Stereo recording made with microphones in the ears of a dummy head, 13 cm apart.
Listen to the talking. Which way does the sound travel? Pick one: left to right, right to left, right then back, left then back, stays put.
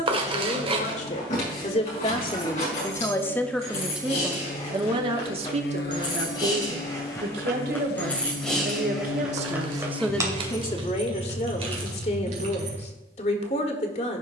right then back.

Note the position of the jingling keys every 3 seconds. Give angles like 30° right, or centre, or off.
50° left, 40° left, 10° left, 30° right, 50° right.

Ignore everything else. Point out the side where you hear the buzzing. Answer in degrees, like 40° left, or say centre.
70° left.